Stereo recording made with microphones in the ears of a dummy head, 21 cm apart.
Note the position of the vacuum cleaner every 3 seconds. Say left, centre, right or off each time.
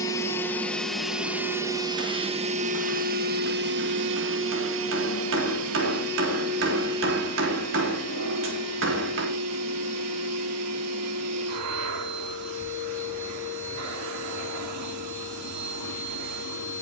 centre, right, right, right, right, right.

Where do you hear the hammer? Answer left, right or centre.
right.